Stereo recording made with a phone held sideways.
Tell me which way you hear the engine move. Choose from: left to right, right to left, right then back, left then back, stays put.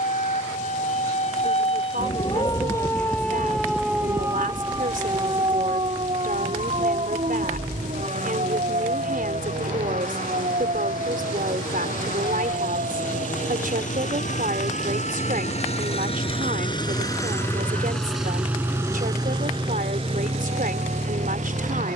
left to right.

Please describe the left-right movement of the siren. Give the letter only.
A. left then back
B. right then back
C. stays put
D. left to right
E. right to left
D.